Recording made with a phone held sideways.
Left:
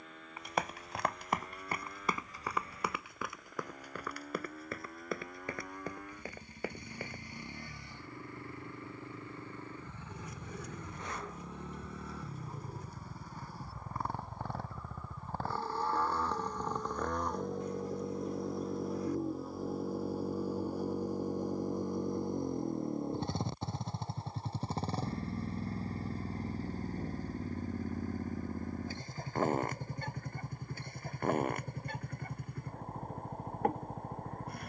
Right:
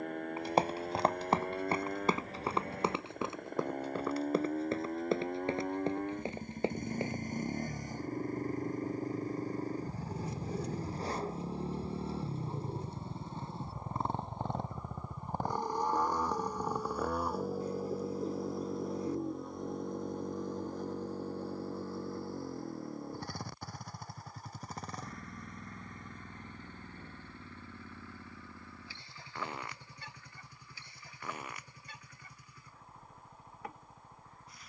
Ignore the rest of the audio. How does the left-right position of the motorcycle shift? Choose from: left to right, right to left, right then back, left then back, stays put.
right to left.